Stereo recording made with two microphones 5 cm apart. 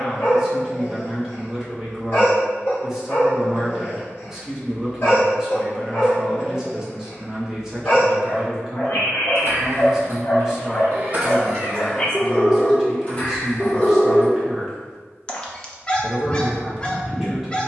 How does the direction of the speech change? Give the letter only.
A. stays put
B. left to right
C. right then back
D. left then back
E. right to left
A.